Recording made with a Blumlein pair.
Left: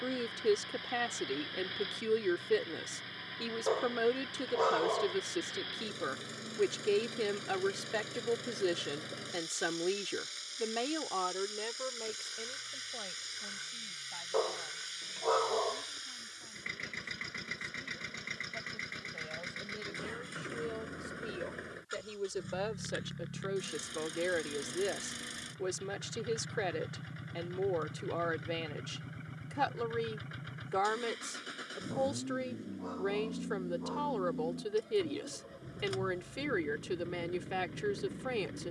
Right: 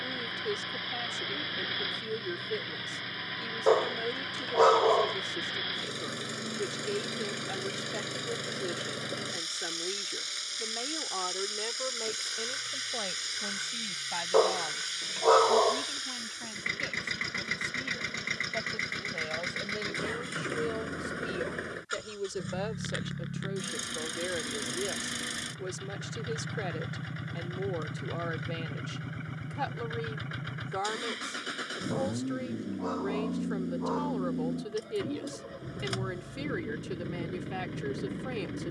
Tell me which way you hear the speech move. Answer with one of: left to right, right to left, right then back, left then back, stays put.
right then back.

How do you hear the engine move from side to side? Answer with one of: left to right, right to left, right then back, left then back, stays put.
stays put.